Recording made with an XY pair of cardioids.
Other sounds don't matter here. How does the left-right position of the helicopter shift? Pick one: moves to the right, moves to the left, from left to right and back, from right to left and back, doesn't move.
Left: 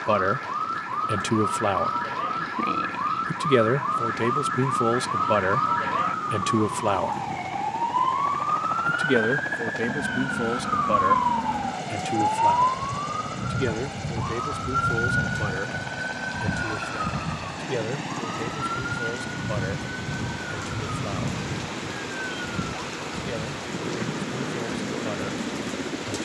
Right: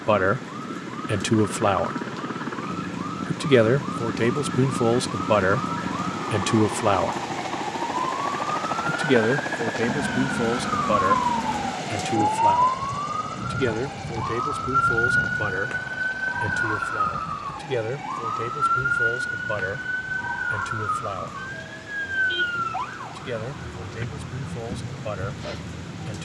moves to the left.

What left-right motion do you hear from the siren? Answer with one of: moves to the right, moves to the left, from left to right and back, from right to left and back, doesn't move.
moves to the right.